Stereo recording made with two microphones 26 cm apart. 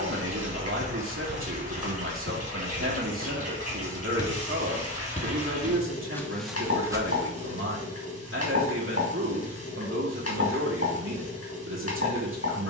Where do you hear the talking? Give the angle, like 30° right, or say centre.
50° right.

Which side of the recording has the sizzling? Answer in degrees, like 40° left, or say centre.
70° left.